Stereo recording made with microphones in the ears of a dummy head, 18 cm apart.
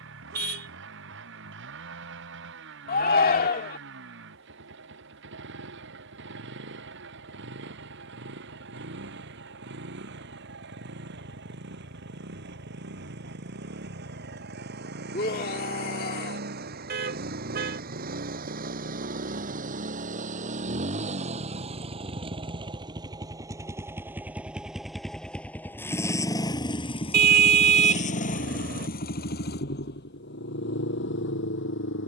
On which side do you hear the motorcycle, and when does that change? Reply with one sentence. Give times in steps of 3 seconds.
You can hear the motorcycle on the right from 0 s, in the centre from 24 s and on the left from 27 s.